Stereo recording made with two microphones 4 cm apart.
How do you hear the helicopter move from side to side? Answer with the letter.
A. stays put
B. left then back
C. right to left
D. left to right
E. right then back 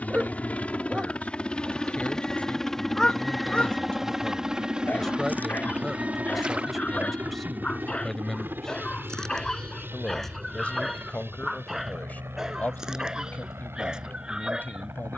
D.